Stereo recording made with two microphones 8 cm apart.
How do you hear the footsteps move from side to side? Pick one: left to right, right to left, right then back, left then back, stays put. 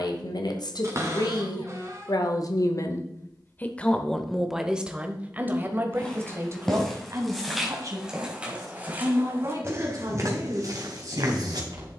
left to right.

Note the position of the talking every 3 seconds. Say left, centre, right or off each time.
left, centre, right, right.